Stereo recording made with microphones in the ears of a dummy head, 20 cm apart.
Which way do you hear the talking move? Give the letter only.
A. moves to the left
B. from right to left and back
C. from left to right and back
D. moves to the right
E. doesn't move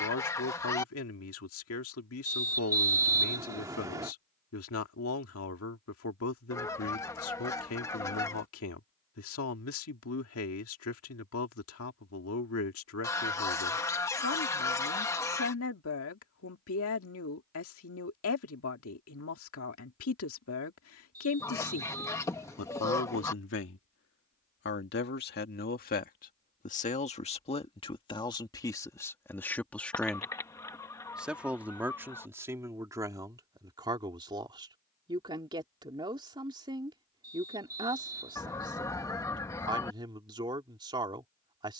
D.